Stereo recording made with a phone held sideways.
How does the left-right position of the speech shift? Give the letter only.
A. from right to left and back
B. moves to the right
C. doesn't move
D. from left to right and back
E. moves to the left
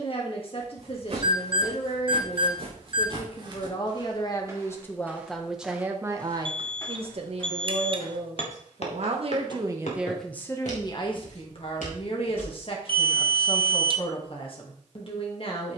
D.